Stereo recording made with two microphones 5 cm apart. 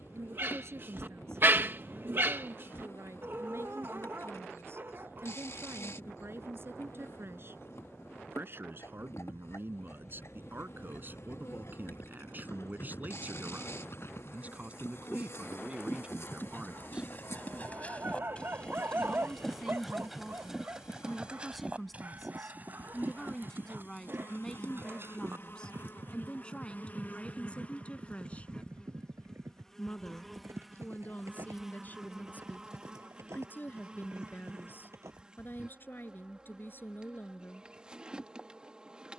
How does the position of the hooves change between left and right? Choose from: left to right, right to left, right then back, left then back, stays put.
left to right.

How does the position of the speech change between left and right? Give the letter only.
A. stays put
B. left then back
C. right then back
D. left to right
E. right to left
E.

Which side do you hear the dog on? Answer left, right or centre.
right.